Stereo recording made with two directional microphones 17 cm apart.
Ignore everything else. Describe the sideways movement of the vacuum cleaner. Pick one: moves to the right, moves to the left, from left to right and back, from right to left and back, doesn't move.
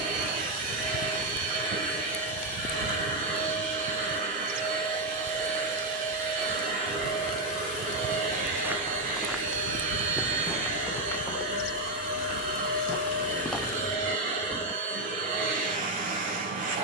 doesn't move.